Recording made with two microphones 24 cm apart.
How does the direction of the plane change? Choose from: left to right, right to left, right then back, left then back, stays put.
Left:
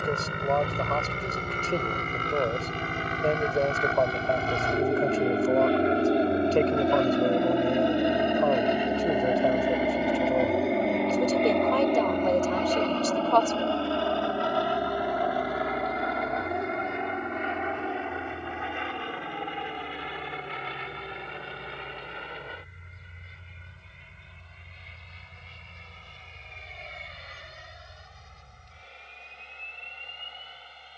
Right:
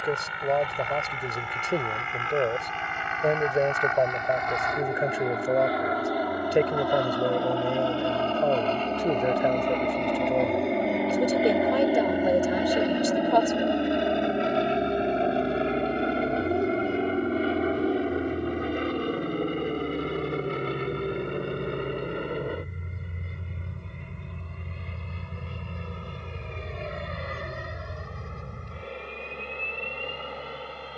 left to right.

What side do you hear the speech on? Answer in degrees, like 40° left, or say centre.
10° right.